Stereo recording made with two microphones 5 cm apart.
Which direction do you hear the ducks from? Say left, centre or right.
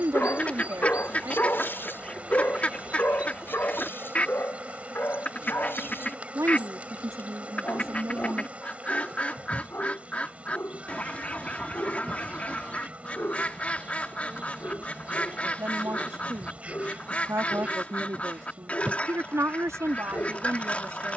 left.